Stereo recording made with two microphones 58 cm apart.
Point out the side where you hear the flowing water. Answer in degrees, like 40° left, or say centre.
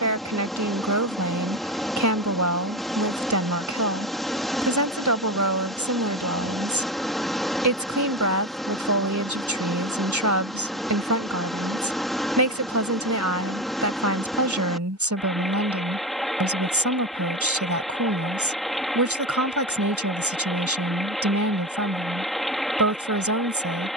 centre.